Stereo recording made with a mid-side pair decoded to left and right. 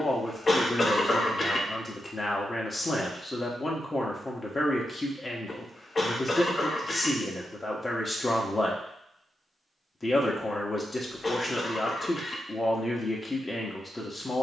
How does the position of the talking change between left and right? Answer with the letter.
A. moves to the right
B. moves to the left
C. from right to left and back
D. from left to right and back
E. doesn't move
E.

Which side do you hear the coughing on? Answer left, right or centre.
left.